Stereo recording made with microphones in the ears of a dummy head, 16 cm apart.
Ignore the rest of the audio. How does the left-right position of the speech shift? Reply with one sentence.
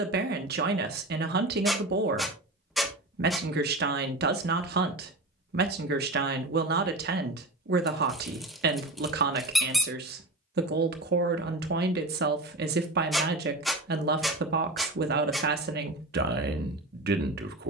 You can hear the speech stay in one place.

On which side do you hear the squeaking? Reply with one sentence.
In this clip you hear the squeaking in the centre.